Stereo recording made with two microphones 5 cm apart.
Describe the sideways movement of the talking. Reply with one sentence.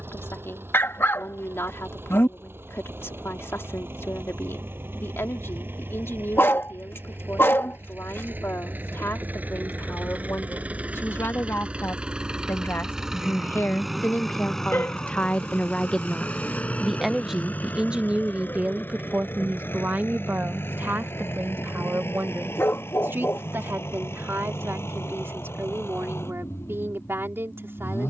You can hear the talking move from left to right.